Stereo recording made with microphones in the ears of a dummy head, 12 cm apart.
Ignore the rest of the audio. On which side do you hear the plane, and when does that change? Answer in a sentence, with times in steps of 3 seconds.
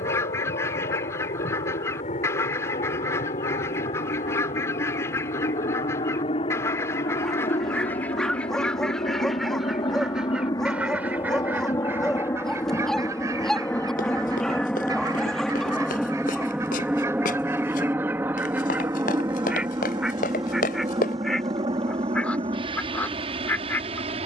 You can hear the plane on the left from 0 s, in the centre from 12 s and on the right from 18 s.